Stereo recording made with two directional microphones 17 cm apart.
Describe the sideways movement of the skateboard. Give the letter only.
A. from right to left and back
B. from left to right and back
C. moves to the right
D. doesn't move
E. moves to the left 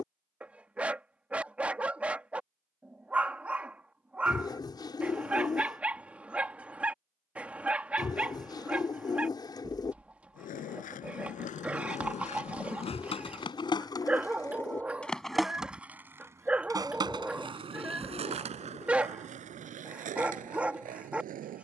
C.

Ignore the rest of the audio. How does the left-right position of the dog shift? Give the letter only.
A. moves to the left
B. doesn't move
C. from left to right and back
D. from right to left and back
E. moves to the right
B.